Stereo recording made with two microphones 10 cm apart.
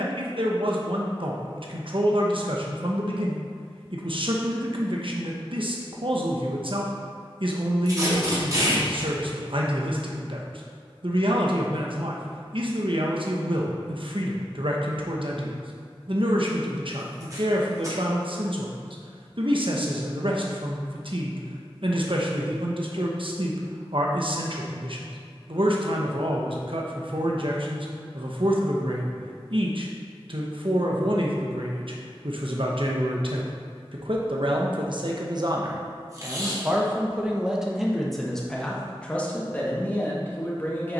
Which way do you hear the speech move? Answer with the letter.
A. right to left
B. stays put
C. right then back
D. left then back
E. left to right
A.